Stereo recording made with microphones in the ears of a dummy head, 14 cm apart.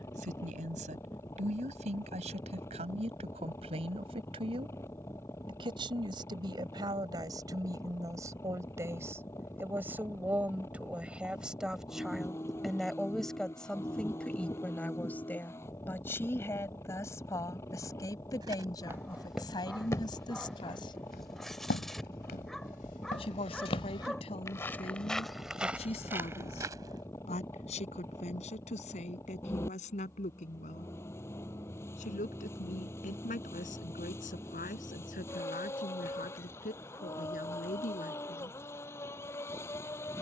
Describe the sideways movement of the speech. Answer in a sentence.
You can hear the speech move to the left.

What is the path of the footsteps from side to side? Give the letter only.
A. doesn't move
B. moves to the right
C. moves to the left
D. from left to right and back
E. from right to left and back
E.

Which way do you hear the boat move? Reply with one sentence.
In this clip you hear the boat stay in one place.